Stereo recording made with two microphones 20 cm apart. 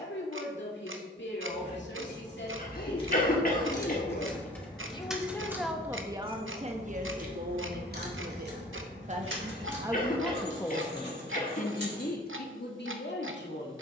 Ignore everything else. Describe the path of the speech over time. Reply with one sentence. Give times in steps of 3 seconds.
You can hear the speech on the left from 0 s, on the right from 6 s, in the centre from 9 s and on the left from 12 s.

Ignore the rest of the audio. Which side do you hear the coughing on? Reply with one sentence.
You can hear the coughing on the left.